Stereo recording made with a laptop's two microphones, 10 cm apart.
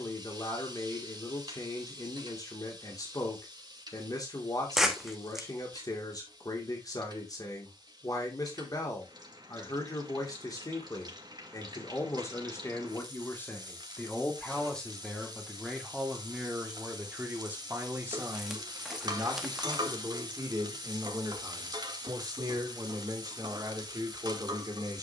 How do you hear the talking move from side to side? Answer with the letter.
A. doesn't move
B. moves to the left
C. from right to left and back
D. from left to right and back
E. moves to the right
E.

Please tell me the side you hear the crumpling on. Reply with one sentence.
You can hear the crumpling in the centre.